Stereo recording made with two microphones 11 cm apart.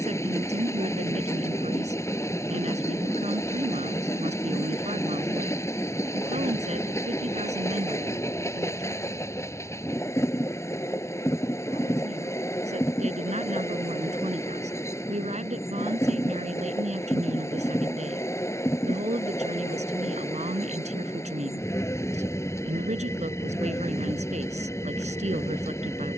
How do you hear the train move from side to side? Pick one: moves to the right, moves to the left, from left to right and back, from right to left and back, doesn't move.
doesn't move.